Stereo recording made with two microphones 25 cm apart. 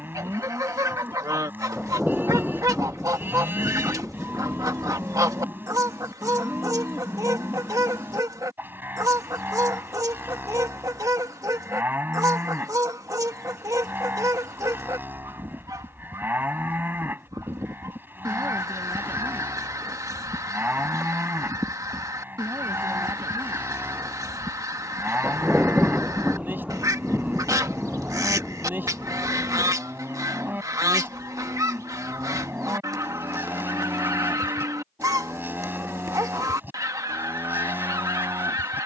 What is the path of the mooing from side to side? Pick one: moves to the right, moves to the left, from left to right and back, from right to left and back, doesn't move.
doesn't move.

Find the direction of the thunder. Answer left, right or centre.
centre.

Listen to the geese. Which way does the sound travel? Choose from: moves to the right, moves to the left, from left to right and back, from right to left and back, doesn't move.
doesn't move.